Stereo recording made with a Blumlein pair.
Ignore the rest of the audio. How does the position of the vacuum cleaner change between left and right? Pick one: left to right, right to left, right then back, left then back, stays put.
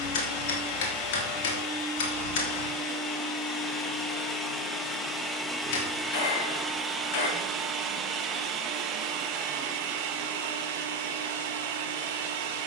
left to right.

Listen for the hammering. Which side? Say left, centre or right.
left.